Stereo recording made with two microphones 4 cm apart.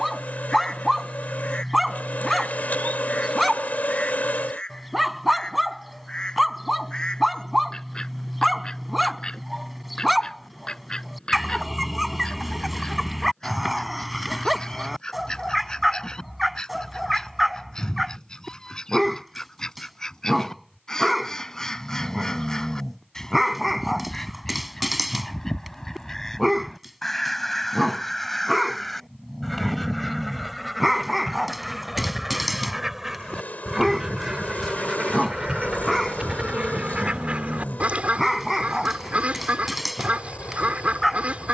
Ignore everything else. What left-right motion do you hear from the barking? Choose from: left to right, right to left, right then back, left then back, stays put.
stays put.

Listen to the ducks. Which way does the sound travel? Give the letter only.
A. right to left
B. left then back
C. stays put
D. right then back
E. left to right
E.